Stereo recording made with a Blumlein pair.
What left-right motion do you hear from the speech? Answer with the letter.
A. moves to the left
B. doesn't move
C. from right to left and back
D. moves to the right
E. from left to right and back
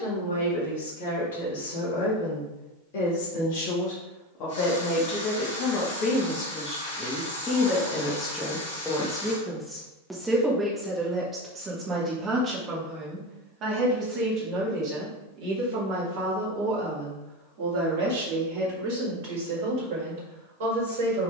D.